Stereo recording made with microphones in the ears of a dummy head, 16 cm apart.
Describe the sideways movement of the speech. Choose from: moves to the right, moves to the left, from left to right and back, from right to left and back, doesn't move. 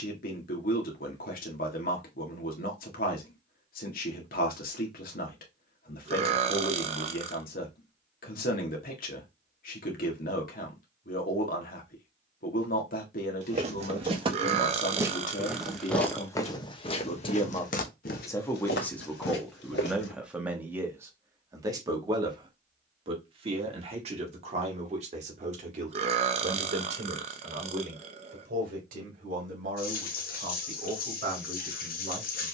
moves to the right.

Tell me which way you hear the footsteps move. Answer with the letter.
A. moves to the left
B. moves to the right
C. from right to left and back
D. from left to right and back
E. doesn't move
A.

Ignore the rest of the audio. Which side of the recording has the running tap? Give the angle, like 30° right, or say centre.
60° left.